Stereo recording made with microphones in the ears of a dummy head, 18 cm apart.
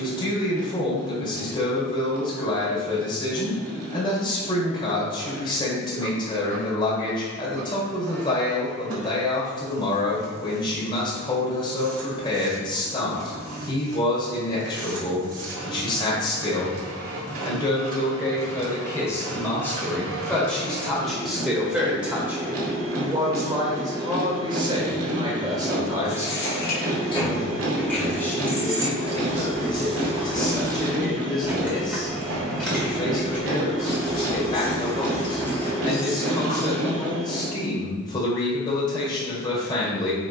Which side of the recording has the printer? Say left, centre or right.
right.